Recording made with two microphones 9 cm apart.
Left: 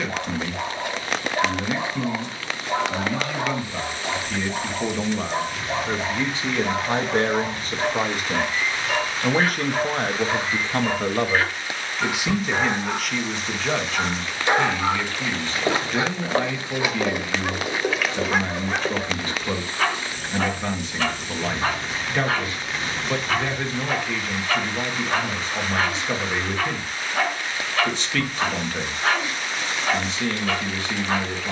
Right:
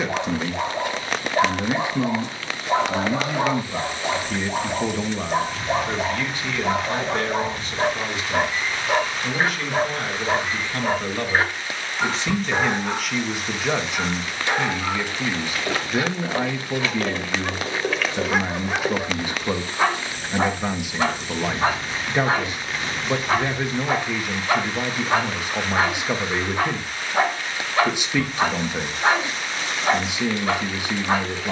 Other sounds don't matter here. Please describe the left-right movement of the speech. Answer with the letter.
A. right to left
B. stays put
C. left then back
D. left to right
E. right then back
C.